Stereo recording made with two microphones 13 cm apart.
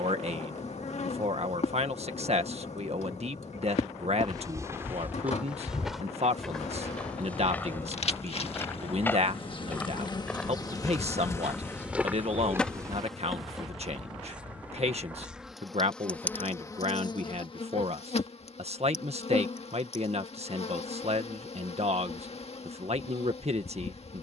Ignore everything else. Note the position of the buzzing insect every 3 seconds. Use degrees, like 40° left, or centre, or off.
60° left, 60° left, 50° left, 30° left, centre, 20° left, 50° left, 50° left.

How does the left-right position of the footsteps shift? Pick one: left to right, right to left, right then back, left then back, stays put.
left then back.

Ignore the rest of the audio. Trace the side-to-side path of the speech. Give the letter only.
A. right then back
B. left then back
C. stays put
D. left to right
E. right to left
C.